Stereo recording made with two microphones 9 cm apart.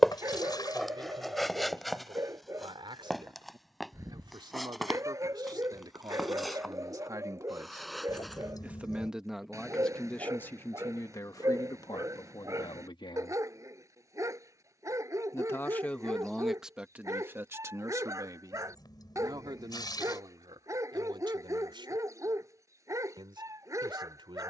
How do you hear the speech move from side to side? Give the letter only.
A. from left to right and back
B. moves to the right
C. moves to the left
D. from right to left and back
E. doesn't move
D.